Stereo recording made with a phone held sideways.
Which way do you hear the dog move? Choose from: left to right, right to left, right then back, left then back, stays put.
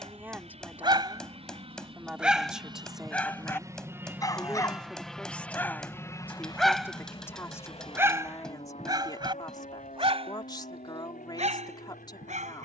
left then back.